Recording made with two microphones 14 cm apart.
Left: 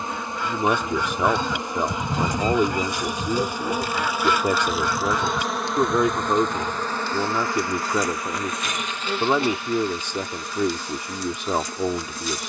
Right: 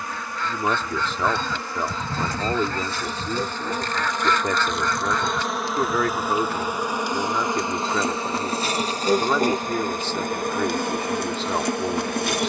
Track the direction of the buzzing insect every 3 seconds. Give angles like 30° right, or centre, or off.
20° left, 10° left, 20° right, 50° right.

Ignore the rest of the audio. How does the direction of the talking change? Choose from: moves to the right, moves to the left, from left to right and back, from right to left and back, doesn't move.
doesn't move.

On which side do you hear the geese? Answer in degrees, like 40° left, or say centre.
10° left.